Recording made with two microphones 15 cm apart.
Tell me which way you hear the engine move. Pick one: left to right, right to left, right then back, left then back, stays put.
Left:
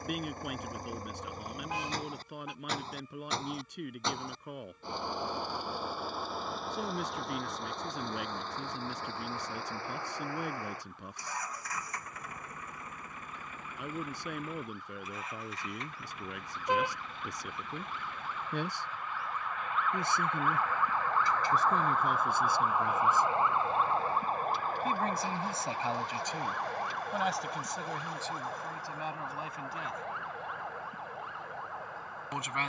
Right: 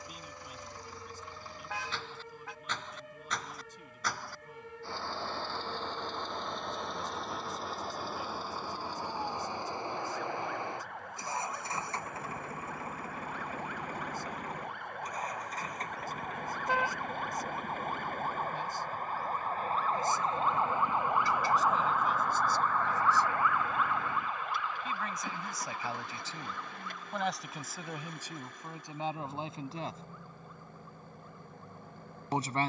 left to right.